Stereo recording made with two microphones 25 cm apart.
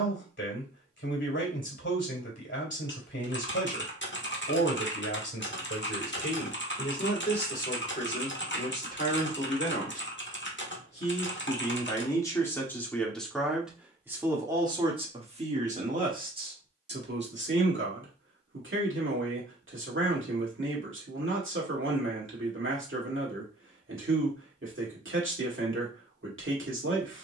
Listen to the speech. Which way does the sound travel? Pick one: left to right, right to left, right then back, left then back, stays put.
left to right.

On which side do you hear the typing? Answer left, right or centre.
left.